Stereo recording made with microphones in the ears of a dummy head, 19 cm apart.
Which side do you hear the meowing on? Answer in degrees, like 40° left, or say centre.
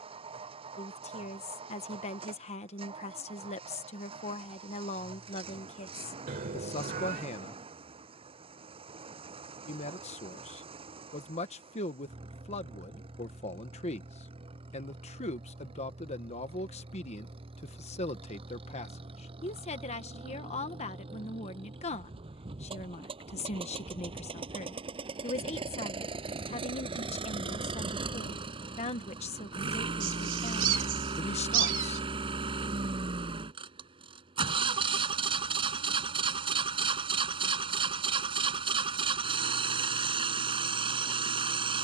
40° right.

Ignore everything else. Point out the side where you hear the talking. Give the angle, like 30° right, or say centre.
30° left.